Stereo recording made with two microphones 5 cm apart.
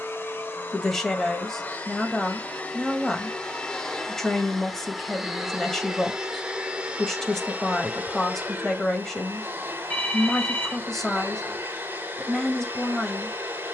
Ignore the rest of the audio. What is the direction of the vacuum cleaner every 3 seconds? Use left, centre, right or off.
left, centre, right, right, right.